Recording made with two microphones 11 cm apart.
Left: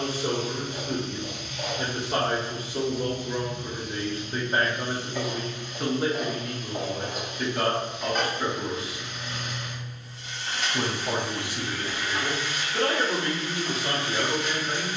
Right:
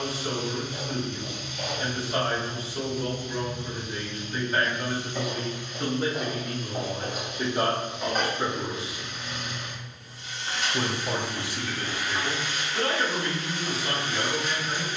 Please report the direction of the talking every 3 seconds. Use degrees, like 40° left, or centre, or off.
50° left, 30° left, 10° right, 10° left, 50° left.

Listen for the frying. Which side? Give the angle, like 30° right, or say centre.
10° right.